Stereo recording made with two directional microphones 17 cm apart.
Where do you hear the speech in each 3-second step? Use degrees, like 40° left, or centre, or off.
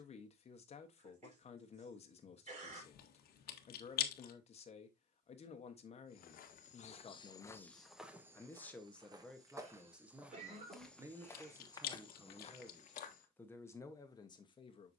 40° left, 40° left, 20° left, 10° right, 10° left.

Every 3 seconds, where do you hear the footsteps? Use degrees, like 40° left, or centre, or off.
off, off, 20° left, centre, 40° left.